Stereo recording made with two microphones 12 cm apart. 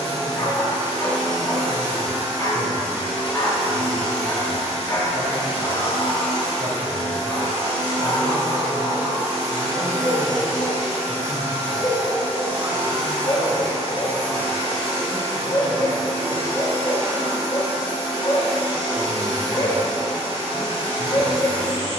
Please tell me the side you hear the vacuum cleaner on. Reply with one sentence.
In this clip you hear the vacuum cleaner on the right.